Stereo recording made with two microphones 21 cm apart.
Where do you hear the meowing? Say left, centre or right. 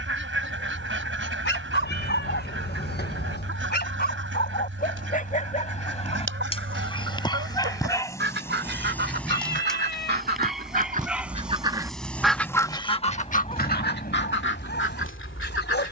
left.